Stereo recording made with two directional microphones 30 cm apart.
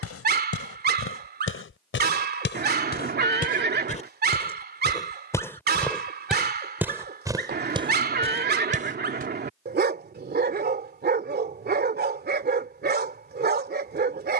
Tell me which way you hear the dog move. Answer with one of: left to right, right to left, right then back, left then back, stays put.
stays put.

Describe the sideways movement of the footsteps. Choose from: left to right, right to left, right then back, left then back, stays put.
left to right.